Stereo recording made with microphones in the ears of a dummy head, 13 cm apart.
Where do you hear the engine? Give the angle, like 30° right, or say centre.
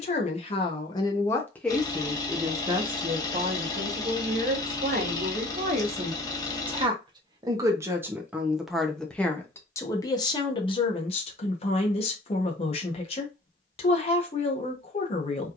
30° left.